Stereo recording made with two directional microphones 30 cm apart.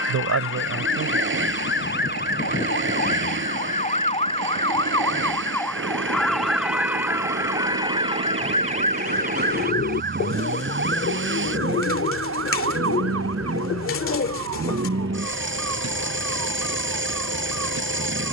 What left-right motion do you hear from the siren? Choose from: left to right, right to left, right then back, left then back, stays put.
left to right.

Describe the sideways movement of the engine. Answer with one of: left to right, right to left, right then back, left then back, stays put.
stays put.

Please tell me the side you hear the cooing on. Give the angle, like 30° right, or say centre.
40° left.